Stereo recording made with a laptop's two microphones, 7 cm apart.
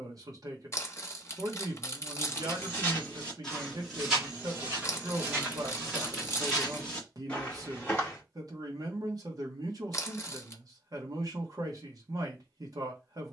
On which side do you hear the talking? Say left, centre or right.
right.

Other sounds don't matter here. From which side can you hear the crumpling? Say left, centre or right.
left.